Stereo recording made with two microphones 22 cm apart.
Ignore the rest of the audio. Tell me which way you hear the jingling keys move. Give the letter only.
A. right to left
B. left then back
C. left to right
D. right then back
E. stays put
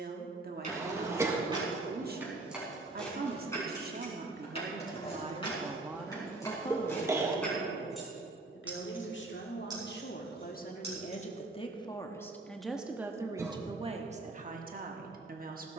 B.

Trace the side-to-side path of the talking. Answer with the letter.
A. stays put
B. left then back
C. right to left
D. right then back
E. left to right
B.